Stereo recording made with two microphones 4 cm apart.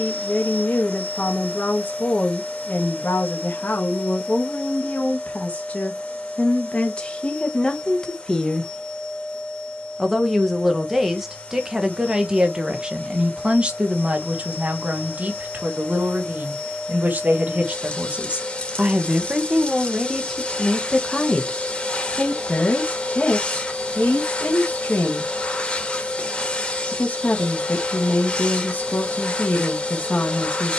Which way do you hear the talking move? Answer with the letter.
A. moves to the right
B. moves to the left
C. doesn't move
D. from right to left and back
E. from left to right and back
E.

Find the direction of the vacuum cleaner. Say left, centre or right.
left.